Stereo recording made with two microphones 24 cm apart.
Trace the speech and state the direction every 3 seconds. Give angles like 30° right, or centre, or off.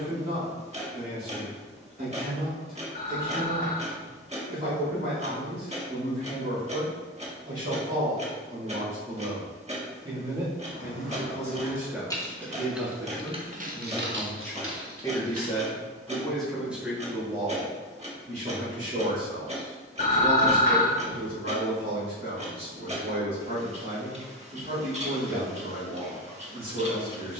40° right, 40° right, 30° right, 20° right, centre, centre, 40° right, 40° right, 40° right.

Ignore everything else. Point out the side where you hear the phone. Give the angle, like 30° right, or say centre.
40° left.